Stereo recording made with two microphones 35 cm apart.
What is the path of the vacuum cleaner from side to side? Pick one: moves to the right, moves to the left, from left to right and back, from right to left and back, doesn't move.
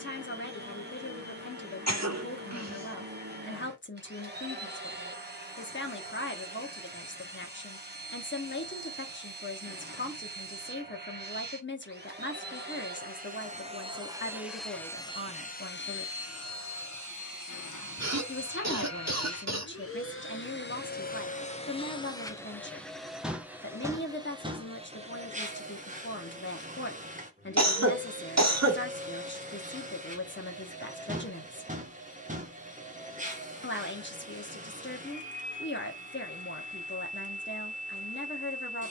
from right to left and back.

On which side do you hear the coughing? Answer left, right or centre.
right.